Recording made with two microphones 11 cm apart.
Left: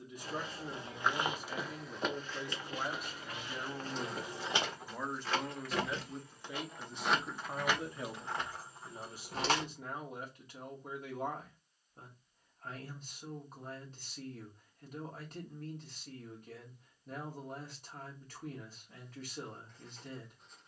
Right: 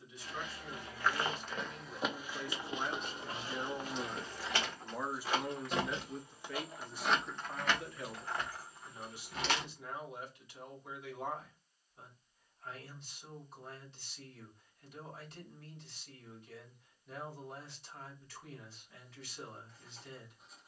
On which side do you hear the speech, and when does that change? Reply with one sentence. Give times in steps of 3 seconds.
You can hear the speech on the left from 0 s, in the centre from 3 s and on the left from 6 s.